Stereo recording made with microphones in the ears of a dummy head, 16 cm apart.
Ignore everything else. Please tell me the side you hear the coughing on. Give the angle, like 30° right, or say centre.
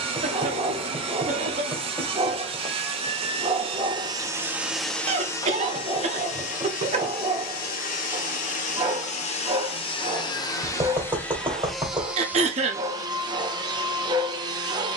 40° right.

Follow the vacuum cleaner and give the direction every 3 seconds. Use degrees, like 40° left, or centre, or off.
30° right, 10° right, 50° left, 20° left, 20° right.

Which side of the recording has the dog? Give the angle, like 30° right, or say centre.
20° right.